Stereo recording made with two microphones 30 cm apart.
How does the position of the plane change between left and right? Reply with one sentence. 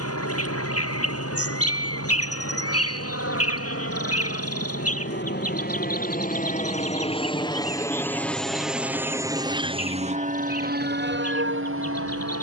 In this clip you hear the plane move to the right.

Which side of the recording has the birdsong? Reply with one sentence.
In this clip you hear the birdsong on the left.